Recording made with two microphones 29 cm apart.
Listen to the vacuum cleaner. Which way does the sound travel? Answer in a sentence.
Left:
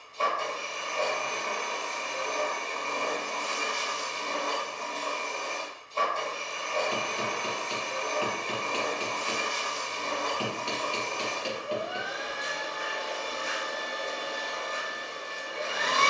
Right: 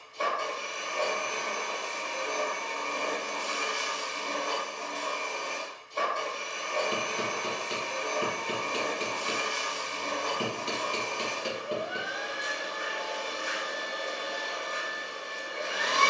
You can hear the vacuum cleaner stay put.